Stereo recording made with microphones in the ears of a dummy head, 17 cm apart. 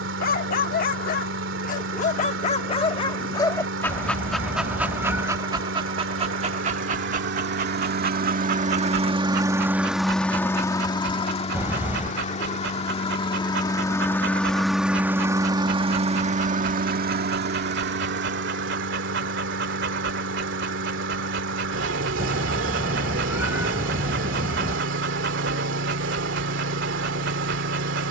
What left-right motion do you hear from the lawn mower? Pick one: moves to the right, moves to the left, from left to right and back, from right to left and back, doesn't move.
from right to left and back.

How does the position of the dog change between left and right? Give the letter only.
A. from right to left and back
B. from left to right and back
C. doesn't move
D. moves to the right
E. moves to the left
D.